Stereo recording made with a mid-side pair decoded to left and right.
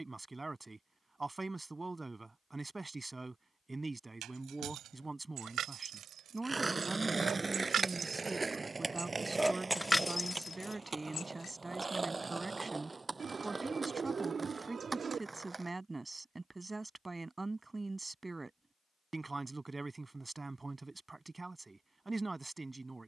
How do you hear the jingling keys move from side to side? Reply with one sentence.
In this clip you hear the jingling keys go from the right side to the left.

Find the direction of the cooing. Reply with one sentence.
In this clip you hear the cooing on the right.